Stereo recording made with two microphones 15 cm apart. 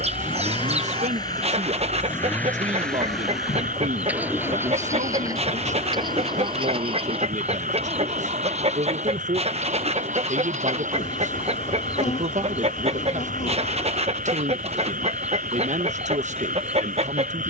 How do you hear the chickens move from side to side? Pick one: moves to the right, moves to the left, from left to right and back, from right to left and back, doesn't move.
doesn't move.